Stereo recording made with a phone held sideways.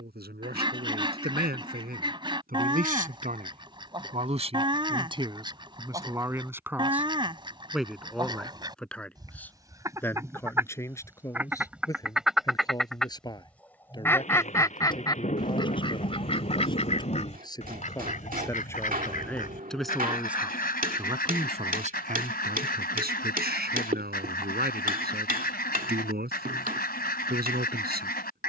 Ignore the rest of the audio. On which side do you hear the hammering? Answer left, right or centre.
right.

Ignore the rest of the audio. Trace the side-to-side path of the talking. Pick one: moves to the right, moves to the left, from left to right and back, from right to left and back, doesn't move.
from right to left and back.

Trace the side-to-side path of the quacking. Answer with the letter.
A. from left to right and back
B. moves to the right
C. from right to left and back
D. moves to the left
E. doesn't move
D.